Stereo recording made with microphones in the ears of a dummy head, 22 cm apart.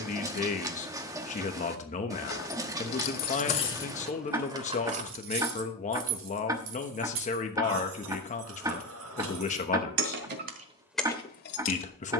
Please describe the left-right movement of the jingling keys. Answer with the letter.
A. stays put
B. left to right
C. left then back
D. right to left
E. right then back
E.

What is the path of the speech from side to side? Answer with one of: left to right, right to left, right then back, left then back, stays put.
stays put.